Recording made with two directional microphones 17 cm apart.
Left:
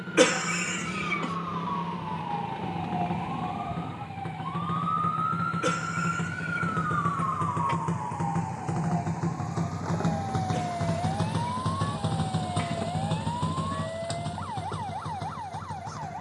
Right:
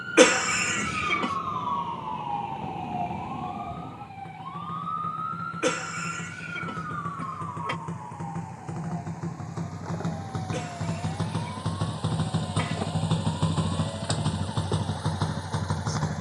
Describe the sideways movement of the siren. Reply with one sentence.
In this clip you hear the siren move from right to left.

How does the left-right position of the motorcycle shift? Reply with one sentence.
In this clip you hear the motorcycle move from left to right.